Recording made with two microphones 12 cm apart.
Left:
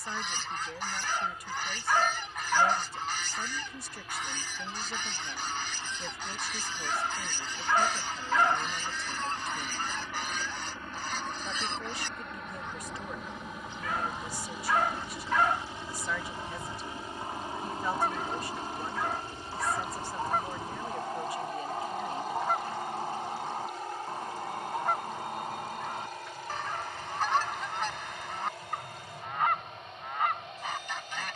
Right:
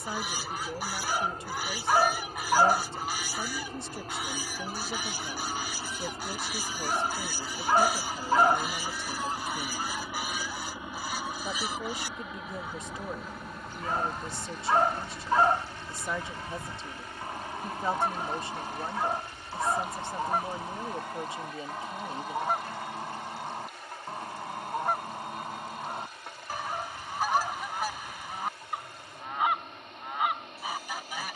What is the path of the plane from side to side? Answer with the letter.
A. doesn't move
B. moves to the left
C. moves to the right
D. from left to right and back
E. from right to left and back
B.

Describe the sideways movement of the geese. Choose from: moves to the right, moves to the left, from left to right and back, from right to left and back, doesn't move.
doesn't move.